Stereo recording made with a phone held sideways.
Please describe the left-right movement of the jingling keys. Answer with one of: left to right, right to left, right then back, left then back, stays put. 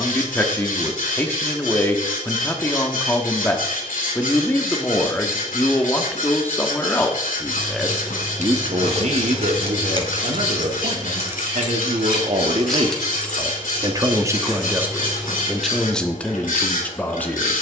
right to left.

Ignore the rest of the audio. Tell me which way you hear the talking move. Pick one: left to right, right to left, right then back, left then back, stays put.
right then back.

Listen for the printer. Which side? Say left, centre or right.
left.